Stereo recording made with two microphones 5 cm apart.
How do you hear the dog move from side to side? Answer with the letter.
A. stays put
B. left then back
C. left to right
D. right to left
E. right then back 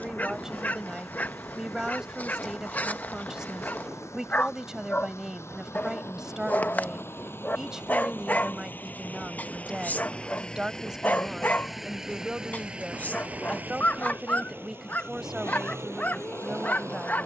A.